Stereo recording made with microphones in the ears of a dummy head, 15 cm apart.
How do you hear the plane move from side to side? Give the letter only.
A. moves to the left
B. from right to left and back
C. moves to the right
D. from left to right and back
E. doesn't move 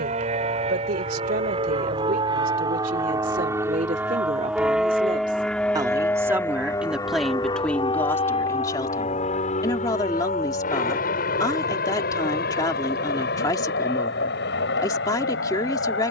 A.